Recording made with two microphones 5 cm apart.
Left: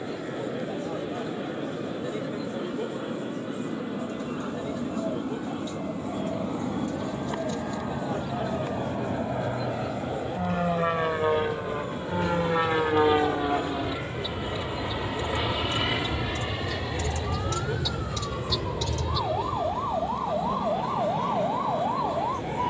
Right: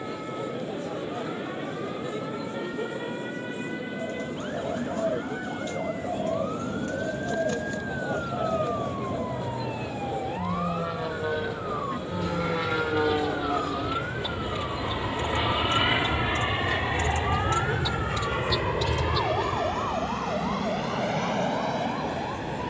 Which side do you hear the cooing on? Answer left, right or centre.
right.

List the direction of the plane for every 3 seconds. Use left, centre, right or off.
left, left, left, left, left, right, right, right.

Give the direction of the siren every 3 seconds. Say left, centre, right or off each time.
right, right, right, right, right, right, centre, left.